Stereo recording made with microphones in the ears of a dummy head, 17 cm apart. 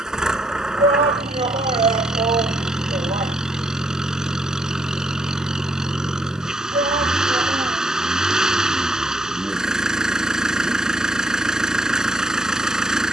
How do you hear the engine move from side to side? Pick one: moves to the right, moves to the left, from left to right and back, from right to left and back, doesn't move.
doesn't move.